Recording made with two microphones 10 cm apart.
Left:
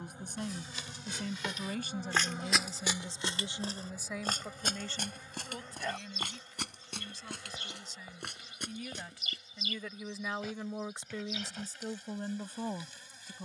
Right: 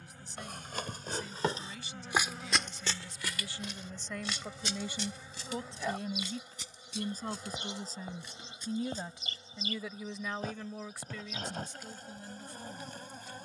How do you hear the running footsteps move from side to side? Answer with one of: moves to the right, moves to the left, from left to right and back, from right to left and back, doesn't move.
moves to the left.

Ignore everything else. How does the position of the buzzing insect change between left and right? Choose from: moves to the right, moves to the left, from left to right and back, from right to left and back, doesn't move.
moves to the right.